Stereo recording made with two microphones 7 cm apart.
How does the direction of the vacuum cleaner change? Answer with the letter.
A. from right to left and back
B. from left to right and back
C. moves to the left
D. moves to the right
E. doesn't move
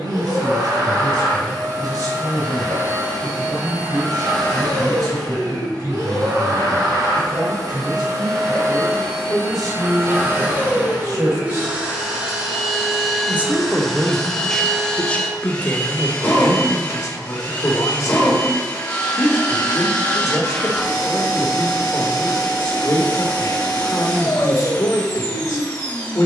C.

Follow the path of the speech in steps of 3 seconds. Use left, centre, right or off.
right, right, right, right, centre, left, left, left, left.